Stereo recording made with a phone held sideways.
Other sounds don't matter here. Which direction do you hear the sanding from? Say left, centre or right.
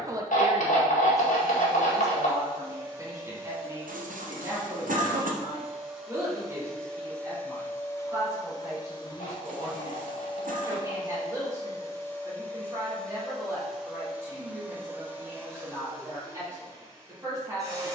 left.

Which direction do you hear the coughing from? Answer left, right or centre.
right.